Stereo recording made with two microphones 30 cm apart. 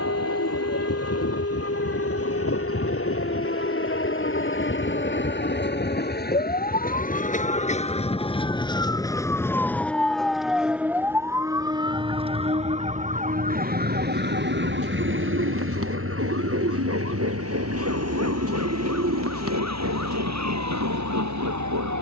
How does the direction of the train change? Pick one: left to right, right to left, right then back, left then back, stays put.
left to right.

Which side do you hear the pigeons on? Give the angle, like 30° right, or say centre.
50° right.